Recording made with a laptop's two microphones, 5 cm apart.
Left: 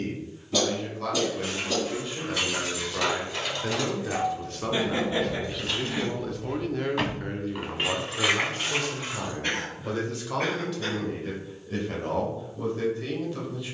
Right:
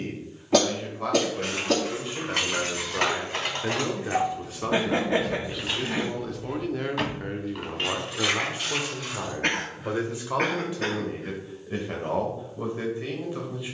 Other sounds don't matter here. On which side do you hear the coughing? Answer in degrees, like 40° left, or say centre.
70° right.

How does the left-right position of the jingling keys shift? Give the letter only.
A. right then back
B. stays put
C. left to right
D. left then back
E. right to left
E.